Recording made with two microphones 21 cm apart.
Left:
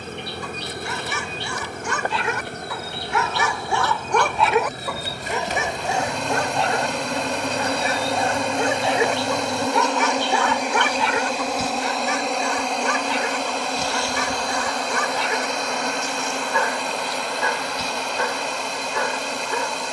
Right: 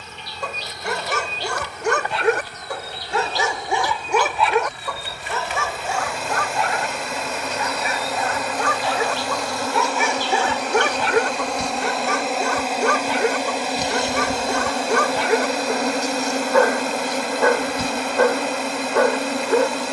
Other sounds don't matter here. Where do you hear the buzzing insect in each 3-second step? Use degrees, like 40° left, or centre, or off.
50° left, 40° left, 30° left, 10° left, 10° right, 40° right, 60° right.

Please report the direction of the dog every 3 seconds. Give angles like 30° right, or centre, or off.
60° right, centre, 30° left, 30° right, 60° right, 60° right, 60° right.